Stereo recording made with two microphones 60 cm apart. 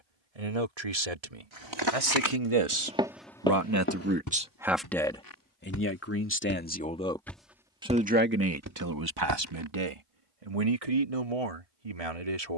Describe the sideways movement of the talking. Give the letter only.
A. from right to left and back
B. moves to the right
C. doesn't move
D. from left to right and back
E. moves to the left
A.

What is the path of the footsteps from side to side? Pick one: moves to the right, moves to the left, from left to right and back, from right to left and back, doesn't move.
from right to left and back.